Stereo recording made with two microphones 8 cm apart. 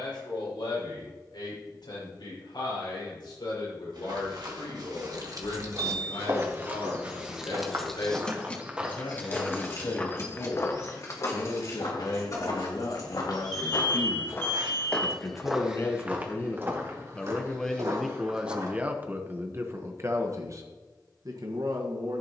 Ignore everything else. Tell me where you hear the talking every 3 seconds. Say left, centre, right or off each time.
left, left, left, left, left, left, right, right.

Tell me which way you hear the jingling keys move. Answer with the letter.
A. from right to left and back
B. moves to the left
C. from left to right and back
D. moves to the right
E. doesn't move
B.